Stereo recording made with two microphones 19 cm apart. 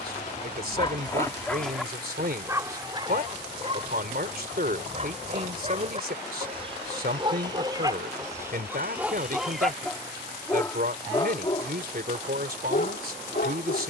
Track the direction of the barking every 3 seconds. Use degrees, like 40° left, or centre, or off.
10° left, 30° right, 20° right, 10° left, 60° left.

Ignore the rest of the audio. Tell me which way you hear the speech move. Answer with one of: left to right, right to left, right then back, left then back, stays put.
stays put.